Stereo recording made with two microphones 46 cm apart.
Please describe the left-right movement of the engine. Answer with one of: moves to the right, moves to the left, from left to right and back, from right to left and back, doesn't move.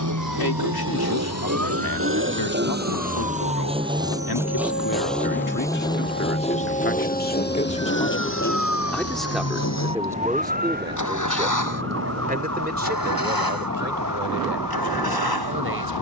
moves to the left.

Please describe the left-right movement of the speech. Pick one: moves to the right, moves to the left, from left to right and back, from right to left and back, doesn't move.
moves to the right.